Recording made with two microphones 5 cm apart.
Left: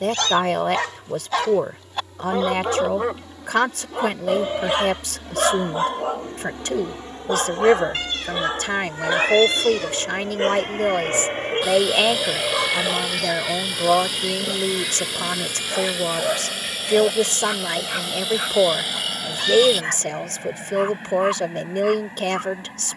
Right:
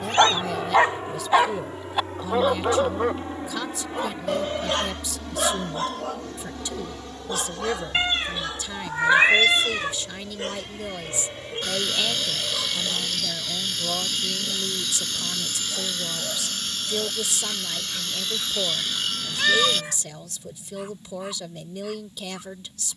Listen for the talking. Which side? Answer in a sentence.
In this clip you hear the talking on the left.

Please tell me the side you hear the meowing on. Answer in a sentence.
You can hear the meowing on the right.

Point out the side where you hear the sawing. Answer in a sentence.
In this clip you hear the sawing in the centre.